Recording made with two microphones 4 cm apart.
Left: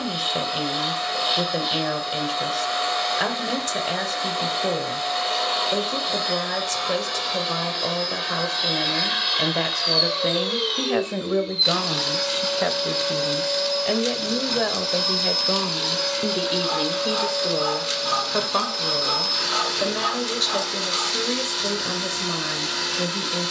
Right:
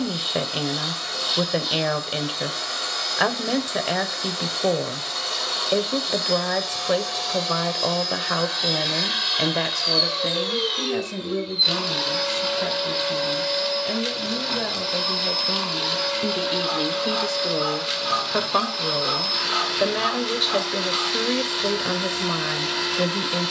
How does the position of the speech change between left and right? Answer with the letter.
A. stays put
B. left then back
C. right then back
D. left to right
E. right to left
B.